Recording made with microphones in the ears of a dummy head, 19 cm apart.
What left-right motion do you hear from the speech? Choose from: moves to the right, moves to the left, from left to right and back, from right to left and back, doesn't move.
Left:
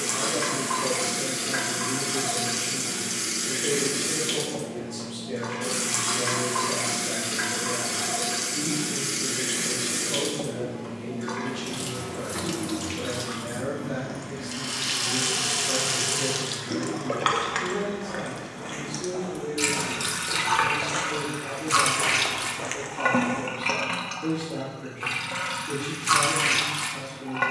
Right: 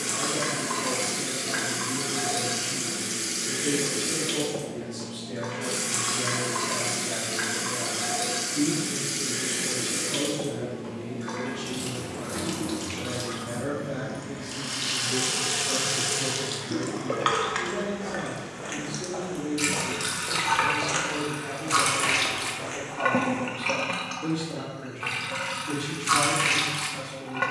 moves to the right.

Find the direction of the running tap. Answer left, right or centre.
centre.